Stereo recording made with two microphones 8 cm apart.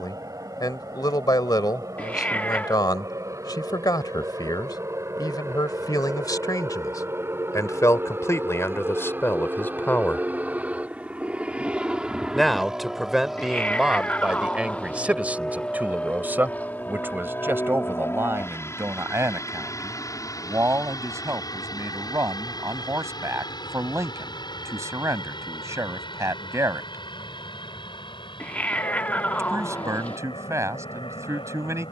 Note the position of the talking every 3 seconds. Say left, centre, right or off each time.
left, left, left, left, centre, right, right, right, right, right, right.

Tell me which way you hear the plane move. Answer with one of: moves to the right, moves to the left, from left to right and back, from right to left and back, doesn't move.
moves to the left.